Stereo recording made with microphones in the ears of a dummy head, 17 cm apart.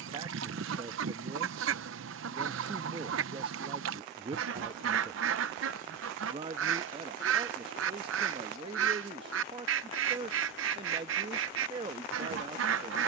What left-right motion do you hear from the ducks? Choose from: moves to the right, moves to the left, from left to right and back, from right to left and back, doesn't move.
doesn't move.